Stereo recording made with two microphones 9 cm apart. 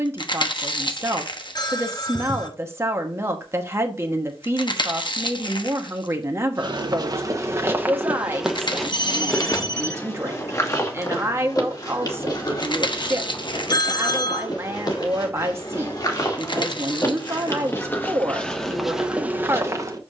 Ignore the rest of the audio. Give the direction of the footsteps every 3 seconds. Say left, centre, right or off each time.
off, off, right, left, left, left, centre.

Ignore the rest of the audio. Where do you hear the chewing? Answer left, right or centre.
left.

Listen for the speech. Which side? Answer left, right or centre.
right.